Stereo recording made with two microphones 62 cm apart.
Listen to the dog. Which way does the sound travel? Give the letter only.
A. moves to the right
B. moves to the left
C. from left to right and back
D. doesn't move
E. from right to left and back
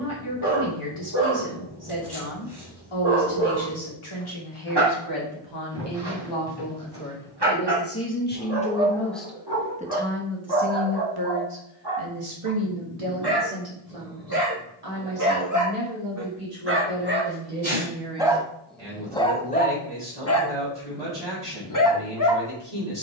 B.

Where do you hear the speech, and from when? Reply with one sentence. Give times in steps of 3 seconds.
You can hear the speech on the left from 0 s and on the right from 9 s.